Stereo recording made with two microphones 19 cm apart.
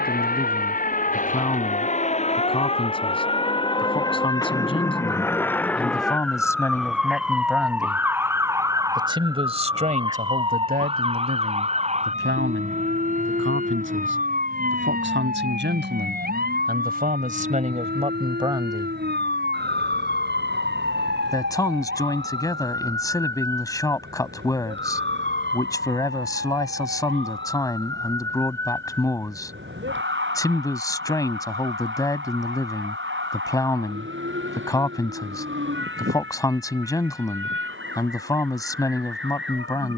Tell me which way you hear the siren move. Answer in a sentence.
You can hear the siren move to the right.